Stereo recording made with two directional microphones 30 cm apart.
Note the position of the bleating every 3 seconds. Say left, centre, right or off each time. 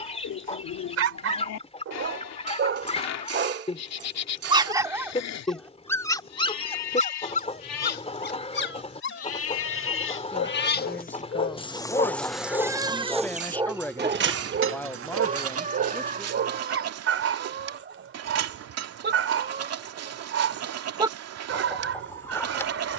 left, left, left, left, right, right, right, right.